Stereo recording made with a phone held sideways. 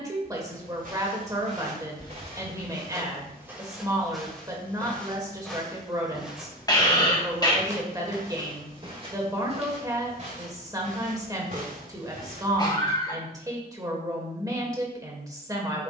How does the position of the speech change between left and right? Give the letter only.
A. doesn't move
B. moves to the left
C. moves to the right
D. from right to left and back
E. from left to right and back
A.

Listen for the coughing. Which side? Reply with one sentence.
In this clip you hear the coughing on the left.